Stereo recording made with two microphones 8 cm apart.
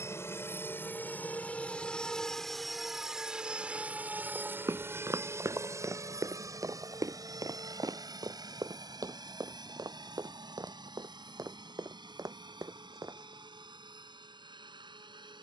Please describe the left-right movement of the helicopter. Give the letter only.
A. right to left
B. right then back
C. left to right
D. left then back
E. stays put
C.